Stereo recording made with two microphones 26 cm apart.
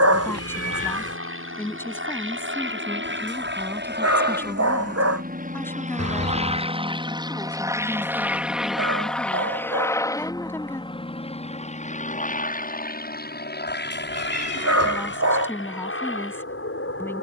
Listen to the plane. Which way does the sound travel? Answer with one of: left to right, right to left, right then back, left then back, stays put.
right to left.